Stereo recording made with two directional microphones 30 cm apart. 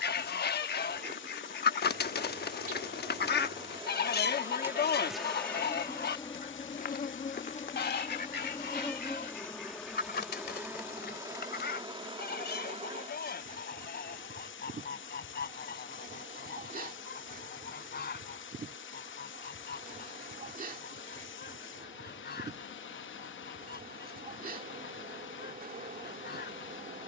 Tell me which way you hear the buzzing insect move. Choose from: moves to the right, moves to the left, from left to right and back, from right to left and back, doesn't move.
from right to left and back.